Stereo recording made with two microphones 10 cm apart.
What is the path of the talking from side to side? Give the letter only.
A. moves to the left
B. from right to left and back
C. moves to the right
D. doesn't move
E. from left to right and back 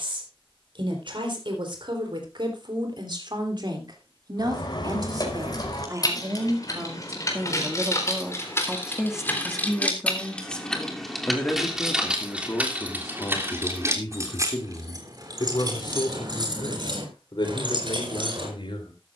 A.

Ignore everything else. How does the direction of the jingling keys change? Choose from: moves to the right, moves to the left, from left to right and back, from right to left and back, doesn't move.
moves to the right.